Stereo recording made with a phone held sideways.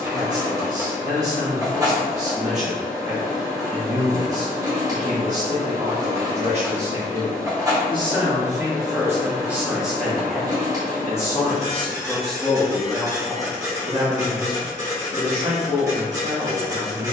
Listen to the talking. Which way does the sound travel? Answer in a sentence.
You can hear the talking move from right to left and back again.